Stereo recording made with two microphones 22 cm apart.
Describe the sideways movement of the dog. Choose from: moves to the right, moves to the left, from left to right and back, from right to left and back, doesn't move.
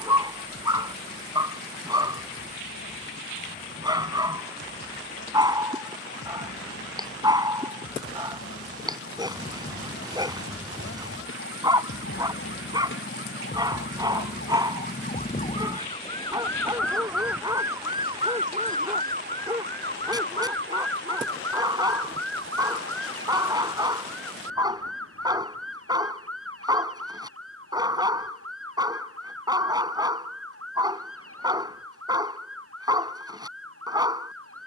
doesn't move.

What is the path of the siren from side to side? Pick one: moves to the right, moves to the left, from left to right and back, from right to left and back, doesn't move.
moves to the right.